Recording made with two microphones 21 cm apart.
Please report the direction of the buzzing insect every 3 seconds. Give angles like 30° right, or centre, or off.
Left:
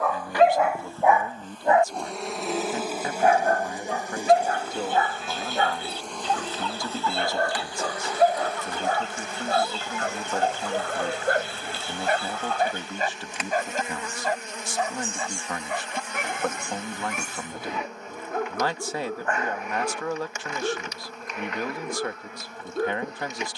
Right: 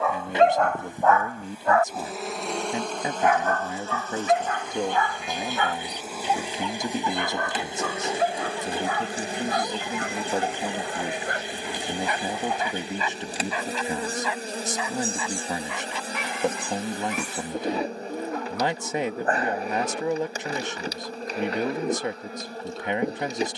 10° right, 10° left, 20° right, 30° right, 30° right, 30° right, 30° right, 30° right.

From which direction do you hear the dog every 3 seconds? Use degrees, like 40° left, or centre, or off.
10° left, 40° left, 40° left, 50° left, 50° left, 50° left, 50° left, 50° left.